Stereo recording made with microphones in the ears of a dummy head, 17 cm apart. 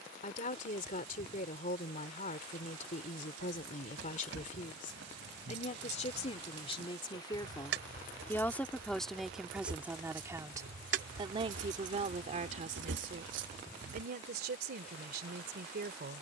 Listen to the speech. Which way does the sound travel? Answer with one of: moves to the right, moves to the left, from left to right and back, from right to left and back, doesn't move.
moves to the right.